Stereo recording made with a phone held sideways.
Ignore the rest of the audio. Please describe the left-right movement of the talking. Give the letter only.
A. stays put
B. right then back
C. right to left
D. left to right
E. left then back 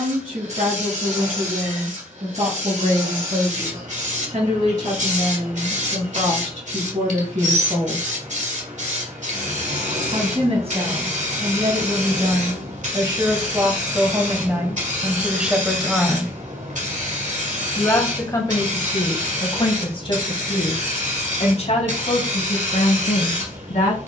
C.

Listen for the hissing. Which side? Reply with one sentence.
You can hear the hissing on the right.